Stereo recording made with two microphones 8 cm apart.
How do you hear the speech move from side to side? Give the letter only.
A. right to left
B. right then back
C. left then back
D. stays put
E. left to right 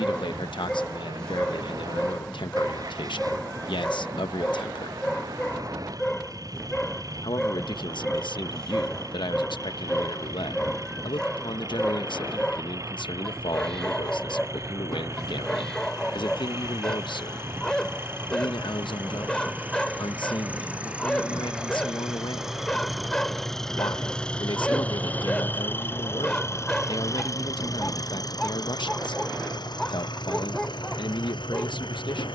D.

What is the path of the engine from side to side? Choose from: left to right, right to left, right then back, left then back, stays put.
right to left.